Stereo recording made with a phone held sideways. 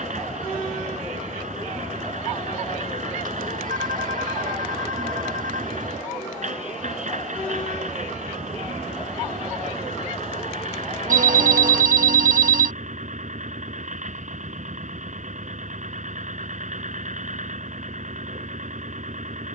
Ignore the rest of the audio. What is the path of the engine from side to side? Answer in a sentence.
In this clip you hear the engine stay in one place.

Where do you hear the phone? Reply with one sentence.
In this clip you hear the phone on the right.